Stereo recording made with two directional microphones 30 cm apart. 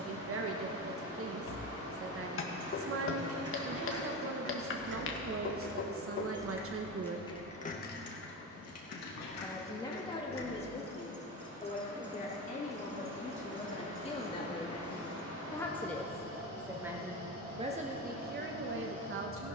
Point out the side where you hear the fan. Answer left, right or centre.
right.